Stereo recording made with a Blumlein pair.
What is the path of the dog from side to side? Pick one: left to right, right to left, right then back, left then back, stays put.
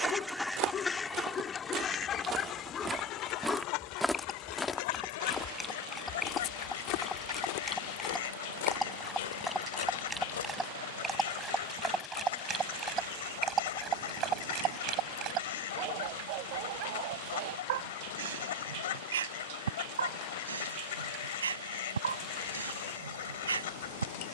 left to right.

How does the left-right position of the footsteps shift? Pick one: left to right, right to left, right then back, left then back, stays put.
right to left.